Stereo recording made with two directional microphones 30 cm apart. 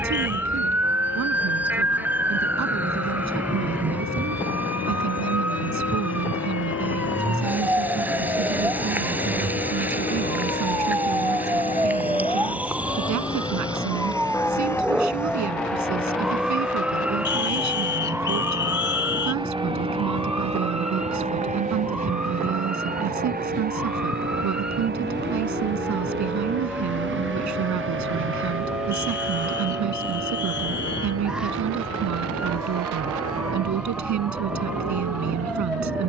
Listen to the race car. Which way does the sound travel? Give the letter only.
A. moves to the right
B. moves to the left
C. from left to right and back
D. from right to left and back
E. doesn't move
A.